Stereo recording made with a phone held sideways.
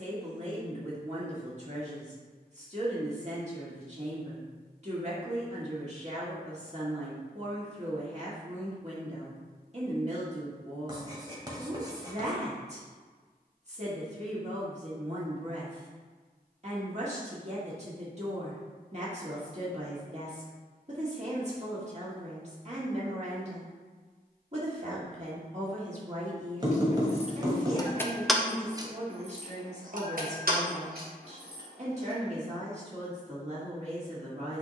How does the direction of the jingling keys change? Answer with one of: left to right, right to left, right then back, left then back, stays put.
left to right.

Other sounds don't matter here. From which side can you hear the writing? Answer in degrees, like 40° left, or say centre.
30° right.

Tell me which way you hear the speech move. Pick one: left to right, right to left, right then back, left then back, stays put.
stays put.